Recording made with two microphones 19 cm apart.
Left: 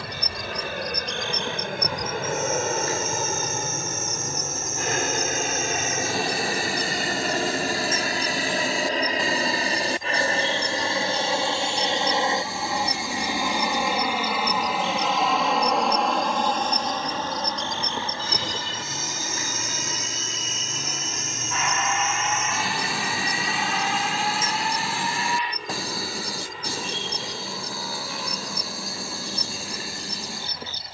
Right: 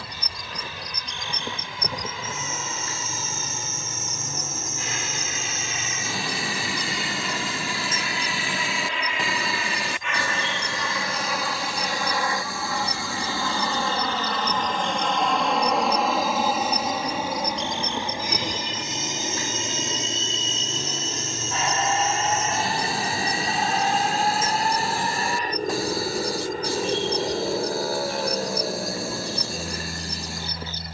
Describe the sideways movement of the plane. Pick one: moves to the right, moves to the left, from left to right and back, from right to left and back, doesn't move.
moves to the right.